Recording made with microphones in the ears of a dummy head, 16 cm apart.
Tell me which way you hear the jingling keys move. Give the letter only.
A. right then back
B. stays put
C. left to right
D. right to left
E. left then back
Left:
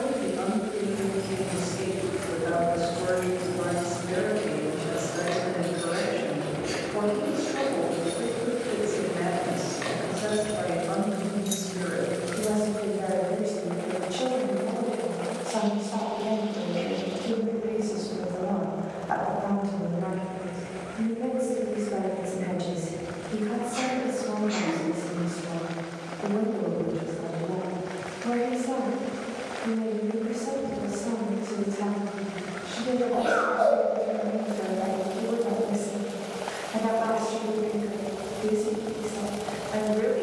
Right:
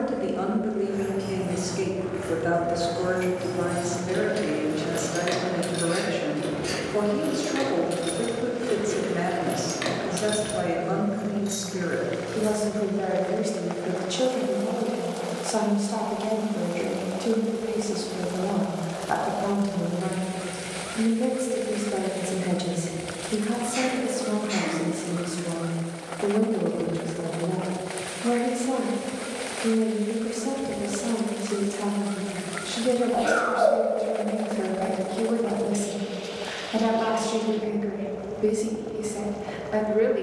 A.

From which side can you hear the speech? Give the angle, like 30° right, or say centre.
50° right.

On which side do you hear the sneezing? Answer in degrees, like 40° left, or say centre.
20° right.